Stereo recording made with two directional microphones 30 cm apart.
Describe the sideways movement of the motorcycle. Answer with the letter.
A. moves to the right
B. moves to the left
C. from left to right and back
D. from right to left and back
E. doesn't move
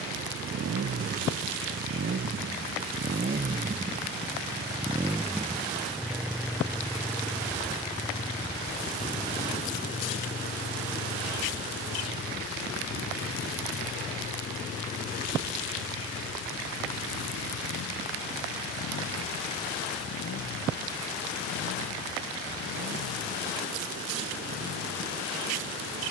B.